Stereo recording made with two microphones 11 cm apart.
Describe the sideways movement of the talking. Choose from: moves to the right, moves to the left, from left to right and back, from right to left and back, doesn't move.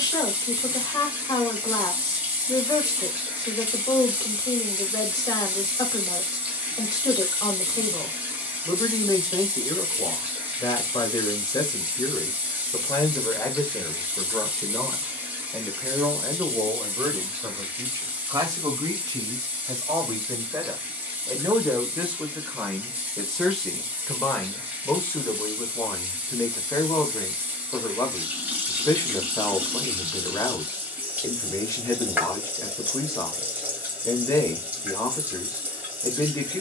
from left to right and back.